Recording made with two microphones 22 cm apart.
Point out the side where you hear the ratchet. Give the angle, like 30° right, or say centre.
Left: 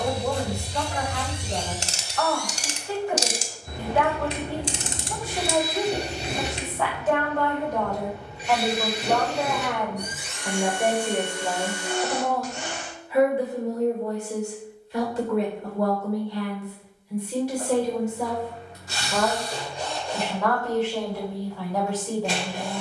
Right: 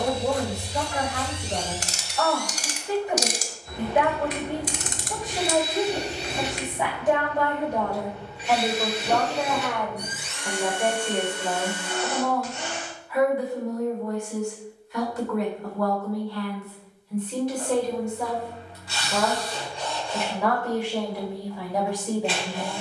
30° left.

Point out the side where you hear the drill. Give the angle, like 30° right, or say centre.
50° left.